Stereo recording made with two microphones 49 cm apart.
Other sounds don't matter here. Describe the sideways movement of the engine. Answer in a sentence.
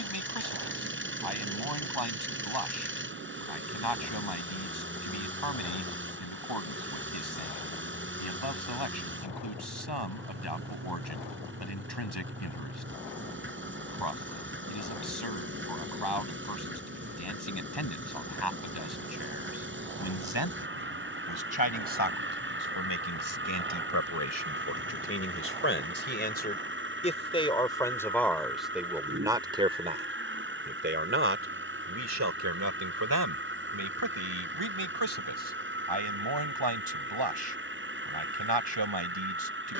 In this clip you hear the engine stay in one place.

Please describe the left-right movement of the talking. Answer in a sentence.
You can hear the talking go from the left side to the right.